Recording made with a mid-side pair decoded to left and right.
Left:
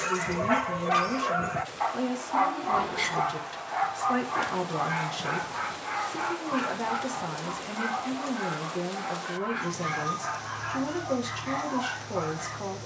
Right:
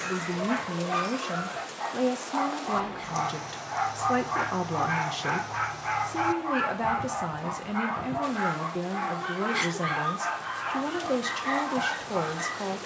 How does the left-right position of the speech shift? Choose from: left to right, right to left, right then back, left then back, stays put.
stays put.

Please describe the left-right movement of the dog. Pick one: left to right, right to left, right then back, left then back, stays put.
left to right.